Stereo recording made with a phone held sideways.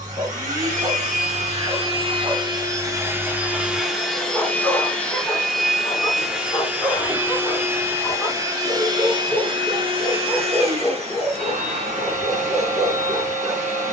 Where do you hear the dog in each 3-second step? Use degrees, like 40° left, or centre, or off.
20° right, centre, 20° left, centre, 20° right.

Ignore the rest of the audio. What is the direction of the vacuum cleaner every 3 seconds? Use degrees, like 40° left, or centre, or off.
40° right, centre, 10° right, 40° right, 50° right.